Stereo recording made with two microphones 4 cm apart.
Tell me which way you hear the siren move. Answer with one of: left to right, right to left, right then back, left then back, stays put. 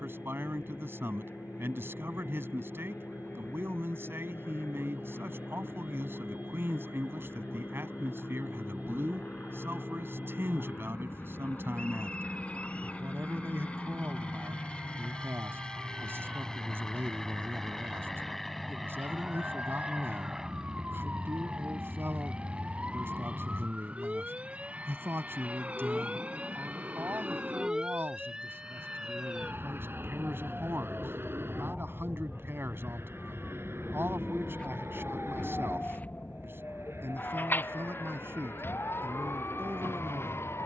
right to left.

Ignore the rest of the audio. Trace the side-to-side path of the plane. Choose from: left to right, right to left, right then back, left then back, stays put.
left to right.